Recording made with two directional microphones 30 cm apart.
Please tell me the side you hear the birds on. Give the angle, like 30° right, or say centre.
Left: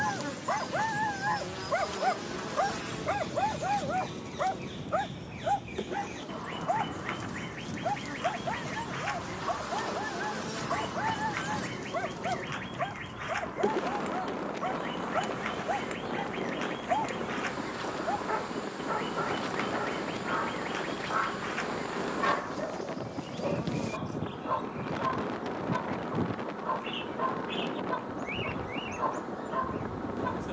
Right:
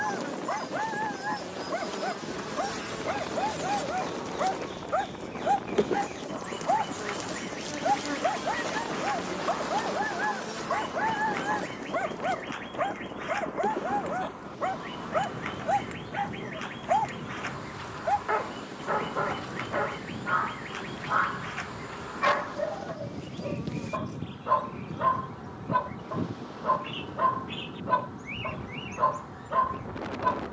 centre.